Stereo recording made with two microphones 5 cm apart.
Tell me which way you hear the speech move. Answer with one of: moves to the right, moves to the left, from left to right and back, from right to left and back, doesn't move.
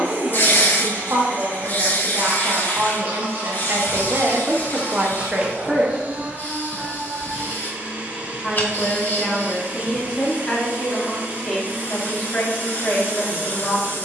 moves to the left.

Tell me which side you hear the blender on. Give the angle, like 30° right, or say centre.
40° right.